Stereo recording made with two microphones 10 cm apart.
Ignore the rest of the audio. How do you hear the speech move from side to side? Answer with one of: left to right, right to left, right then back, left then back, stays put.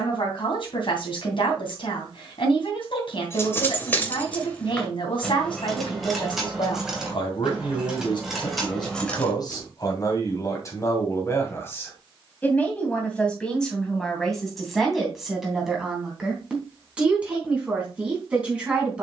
left to right.